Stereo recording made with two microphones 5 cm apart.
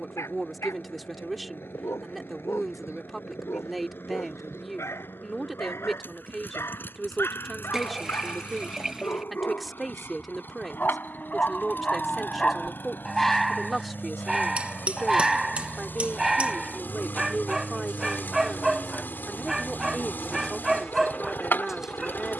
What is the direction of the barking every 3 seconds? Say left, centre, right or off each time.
left, left, left, left, centre, centre, centre, centre.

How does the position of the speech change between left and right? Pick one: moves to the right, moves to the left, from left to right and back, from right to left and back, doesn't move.
doesn't move.